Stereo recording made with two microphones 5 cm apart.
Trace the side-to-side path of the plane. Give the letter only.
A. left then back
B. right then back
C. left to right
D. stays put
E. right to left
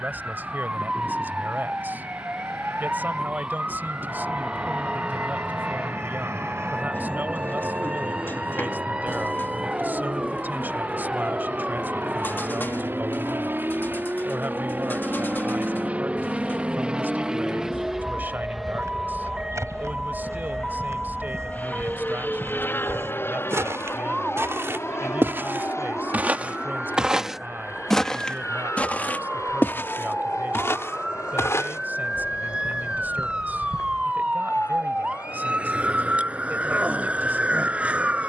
E.